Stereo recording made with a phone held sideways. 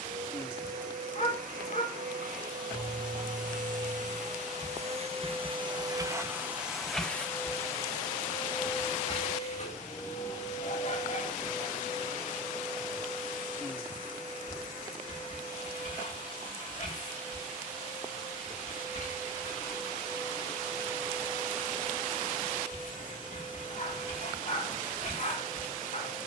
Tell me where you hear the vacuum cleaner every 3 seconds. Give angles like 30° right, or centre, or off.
60° right, 50° right, 10° left, 50° left, 60° left, 60° left, 60° left, 60° left, 60° left.